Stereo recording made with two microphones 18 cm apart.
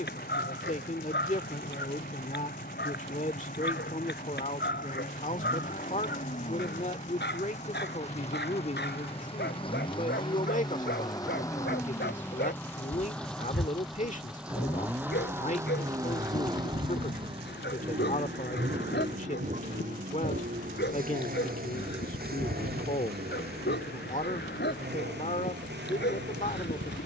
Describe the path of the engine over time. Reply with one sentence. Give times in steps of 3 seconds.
In this clip you hear the engine on the left from 0 s, in the centre from 12 s and on the right from 15 s.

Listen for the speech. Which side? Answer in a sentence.
You can hear the speech on the left.